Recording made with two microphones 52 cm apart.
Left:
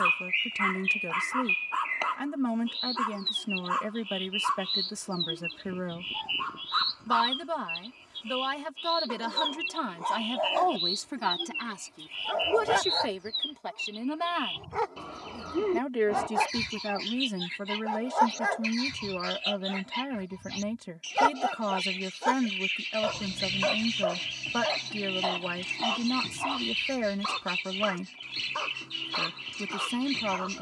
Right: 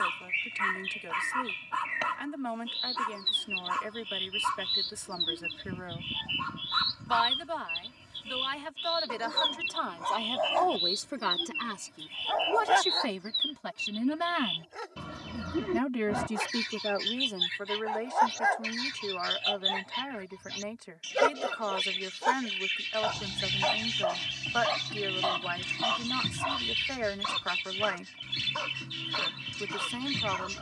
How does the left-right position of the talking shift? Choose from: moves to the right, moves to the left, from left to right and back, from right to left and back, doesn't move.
from left to right and back.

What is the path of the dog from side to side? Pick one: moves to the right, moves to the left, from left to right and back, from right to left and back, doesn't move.
from right to left and back.